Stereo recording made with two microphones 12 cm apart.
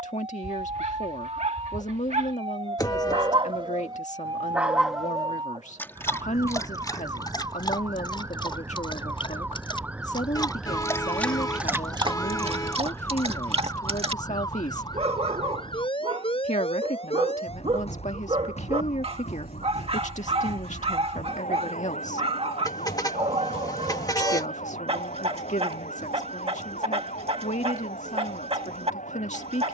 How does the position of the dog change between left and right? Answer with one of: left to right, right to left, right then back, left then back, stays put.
left then back.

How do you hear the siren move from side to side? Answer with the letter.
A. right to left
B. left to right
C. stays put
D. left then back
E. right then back
A.